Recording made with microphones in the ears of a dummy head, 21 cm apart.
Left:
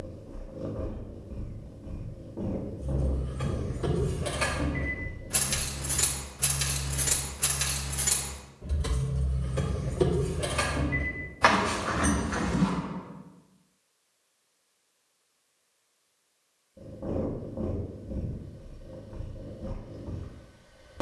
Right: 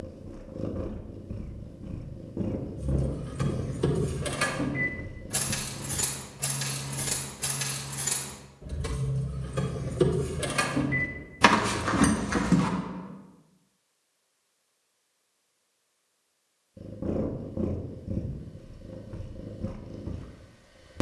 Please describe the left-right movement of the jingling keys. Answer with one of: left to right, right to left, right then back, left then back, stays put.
left then back.